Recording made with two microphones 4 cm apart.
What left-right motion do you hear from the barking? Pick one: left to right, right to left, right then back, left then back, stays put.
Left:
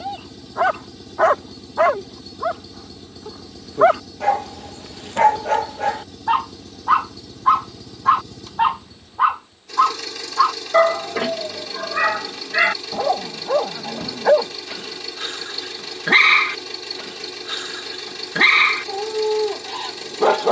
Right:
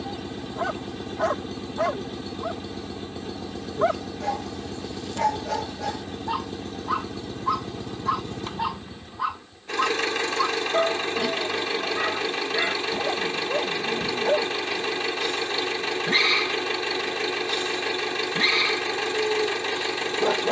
stays put.